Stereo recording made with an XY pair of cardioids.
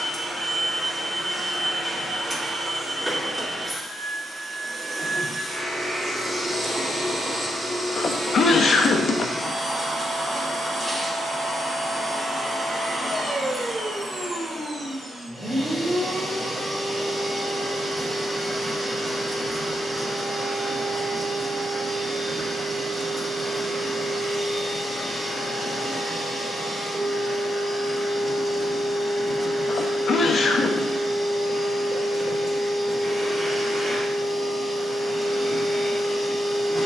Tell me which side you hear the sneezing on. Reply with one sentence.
You can hear the sneezing on the left.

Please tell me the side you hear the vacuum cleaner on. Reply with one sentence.
You can hear the vacuum cleaner in the centre.